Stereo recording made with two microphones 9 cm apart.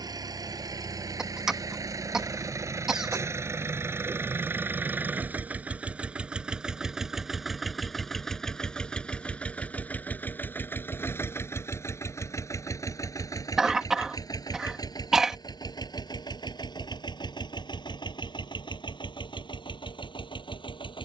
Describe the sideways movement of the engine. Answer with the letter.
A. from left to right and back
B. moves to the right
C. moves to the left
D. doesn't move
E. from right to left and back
C.